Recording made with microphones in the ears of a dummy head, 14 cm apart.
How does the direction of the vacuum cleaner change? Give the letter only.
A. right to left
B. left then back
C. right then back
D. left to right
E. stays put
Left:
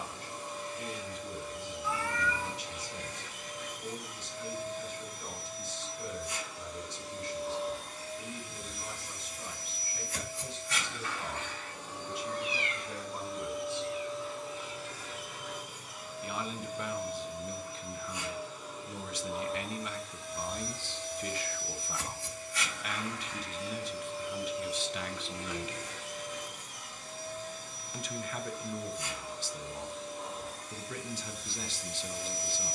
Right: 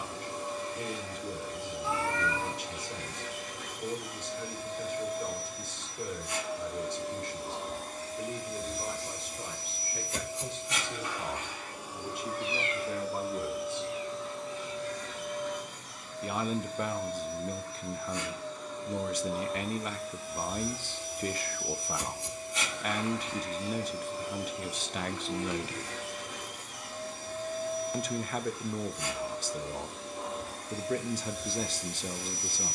B.